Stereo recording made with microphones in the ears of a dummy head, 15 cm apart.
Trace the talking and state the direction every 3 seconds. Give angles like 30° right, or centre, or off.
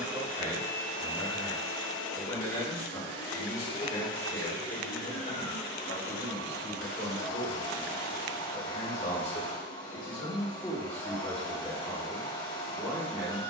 centre, 50° left, 50° left, 20° left, 10° right.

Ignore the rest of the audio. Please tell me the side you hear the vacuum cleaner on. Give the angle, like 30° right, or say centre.
80° left.